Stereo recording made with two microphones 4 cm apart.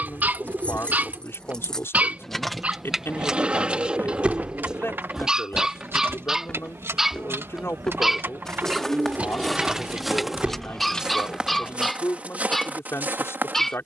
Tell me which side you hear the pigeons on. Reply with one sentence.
You can hear the pigeons on the right.